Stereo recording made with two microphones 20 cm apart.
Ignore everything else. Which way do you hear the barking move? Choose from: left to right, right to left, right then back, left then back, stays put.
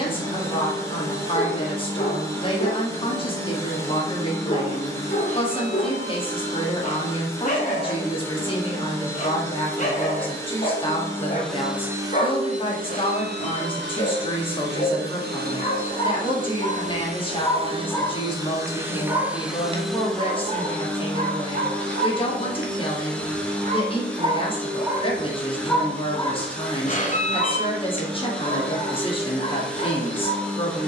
right then back.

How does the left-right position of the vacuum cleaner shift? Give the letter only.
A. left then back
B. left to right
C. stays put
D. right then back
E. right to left
D.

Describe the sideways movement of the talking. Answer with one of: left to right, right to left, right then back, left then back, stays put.
stays put.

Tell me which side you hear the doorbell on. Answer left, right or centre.
left.